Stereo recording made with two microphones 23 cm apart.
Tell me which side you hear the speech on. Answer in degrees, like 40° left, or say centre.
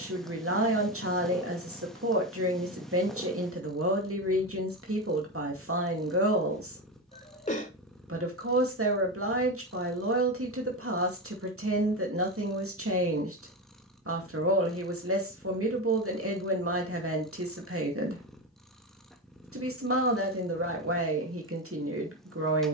70° right.